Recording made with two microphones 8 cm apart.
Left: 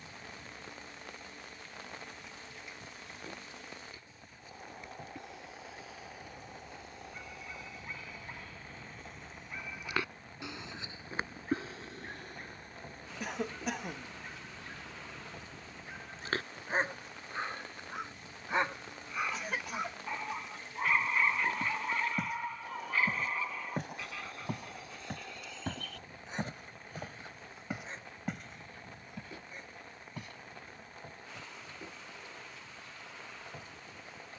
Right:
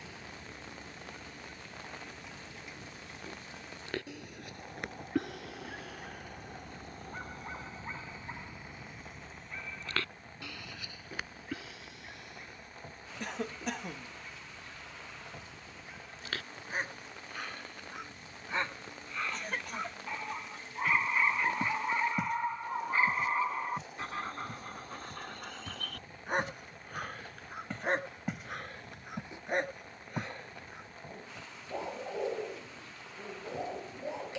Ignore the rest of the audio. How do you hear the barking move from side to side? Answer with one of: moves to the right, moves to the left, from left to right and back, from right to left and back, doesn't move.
from right to left and back.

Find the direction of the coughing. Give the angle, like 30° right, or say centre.
centre.